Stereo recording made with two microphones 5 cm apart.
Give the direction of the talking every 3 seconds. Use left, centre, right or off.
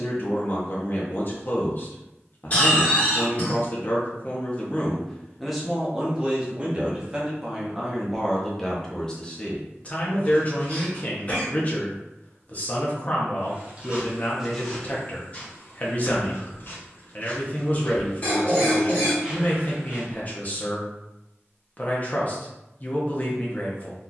left, left, centre, left, left, left, left, left.